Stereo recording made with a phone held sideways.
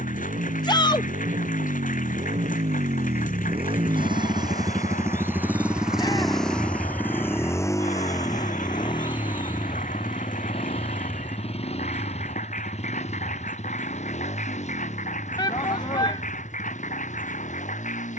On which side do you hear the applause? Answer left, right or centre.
left.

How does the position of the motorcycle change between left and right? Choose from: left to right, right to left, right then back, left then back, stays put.
right to left.